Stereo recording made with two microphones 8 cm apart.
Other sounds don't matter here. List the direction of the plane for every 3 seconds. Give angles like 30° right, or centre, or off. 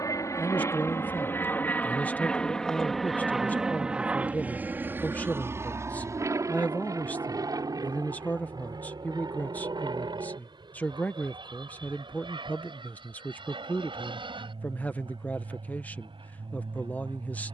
20° left, 20° right, 40° right, 60° right, 60° right, 70° right.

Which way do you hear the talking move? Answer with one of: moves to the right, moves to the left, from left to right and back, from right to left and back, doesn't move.
doesn't move.